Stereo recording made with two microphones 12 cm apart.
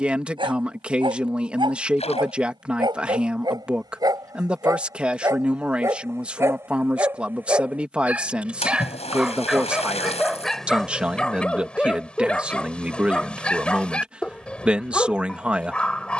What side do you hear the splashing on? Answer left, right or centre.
left.